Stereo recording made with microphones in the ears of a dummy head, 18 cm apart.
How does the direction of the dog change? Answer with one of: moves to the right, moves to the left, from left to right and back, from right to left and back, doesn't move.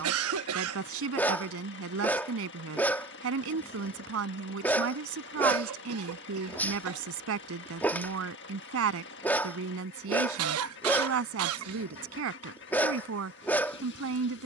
doesn't move.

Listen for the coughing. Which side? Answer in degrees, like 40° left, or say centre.
80° right.